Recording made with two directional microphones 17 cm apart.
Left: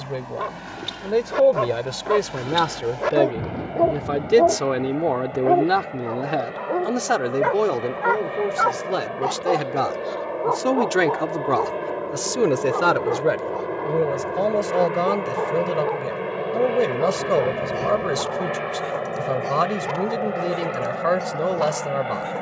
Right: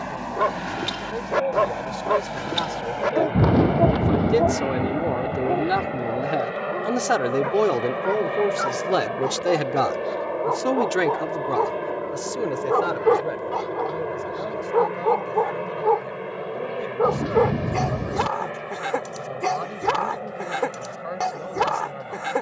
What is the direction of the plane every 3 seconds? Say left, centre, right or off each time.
right, right, right, centre, centre, left, left, left.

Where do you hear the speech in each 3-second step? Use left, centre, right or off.
left, left, centre, centre, left, left, left, left.